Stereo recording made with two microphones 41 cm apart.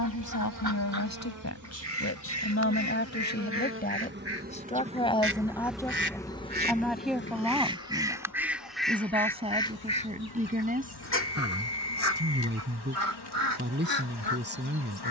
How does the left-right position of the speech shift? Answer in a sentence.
You can hear the speech move to the right.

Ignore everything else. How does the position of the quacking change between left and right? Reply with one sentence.
In this clip you hear the quacking go from the right side to the left.